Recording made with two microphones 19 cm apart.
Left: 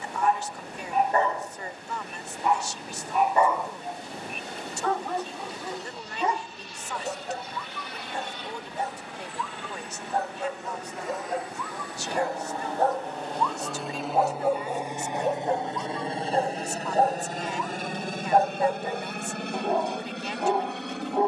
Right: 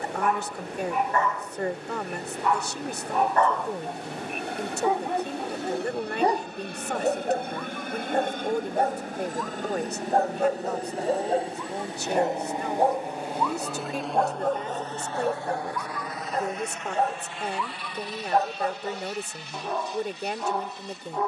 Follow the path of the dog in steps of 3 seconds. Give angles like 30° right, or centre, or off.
30° left, 10° right, 50° right, 40° right, centre, 30° left, 30° left.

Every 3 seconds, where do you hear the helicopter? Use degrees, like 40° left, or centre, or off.
70° right, 60° right, 50° right, 40° right, 10° right, 30° left, 50° left.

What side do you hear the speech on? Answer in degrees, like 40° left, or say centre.
50° right.